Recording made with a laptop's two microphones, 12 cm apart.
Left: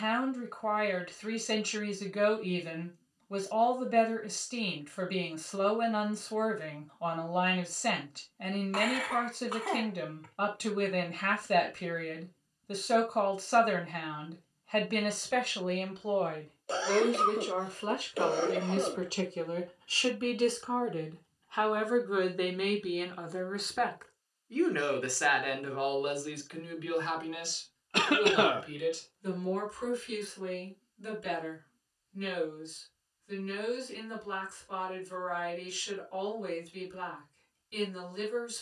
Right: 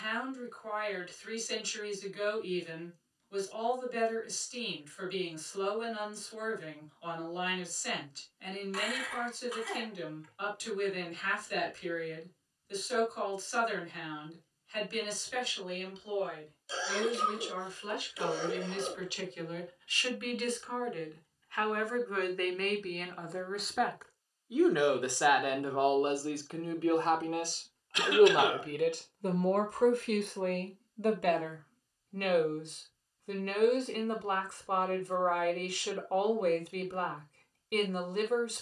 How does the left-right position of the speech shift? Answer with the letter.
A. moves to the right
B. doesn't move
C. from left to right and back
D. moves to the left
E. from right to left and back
A.